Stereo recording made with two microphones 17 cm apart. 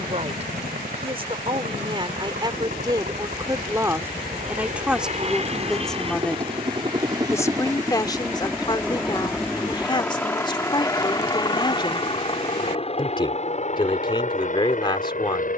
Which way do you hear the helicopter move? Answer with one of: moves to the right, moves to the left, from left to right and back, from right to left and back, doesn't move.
moves to the left.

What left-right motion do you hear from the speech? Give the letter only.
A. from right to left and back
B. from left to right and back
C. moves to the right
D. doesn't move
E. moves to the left
E.